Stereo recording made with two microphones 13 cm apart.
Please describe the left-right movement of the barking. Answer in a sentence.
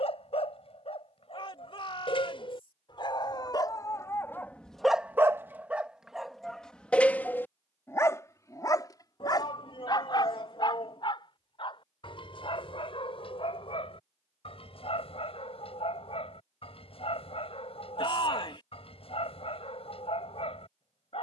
You can hear the barking move from left to right and back again.